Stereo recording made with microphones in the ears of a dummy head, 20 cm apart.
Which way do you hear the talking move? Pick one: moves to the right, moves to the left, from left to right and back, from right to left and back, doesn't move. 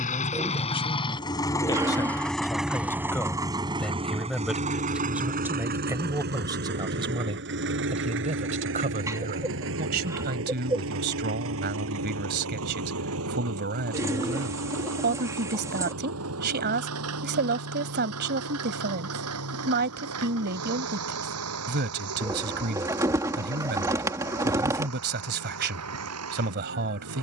moves to the right.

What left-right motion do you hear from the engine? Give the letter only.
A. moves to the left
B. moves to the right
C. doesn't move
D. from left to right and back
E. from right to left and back
B.